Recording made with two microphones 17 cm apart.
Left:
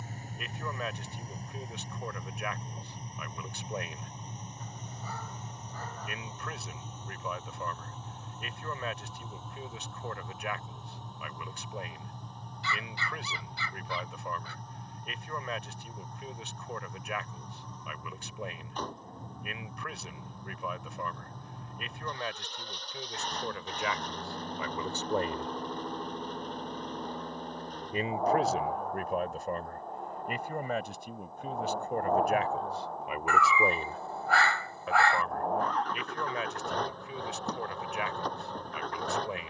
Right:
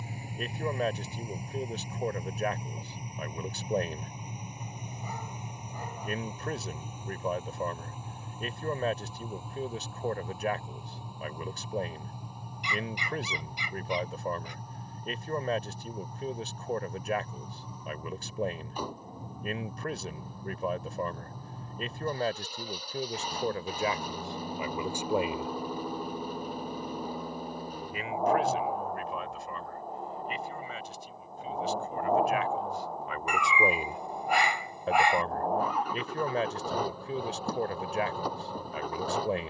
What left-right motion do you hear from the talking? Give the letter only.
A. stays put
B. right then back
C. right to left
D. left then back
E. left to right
D.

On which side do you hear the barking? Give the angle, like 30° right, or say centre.
20° right.